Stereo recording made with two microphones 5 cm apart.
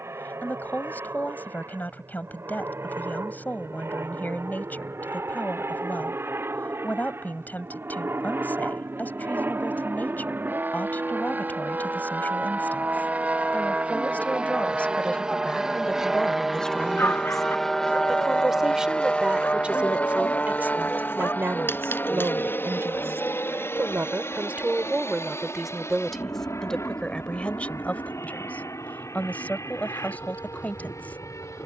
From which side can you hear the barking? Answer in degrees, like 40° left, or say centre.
50° left.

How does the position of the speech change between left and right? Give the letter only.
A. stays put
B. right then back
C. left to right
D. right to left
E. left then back
B.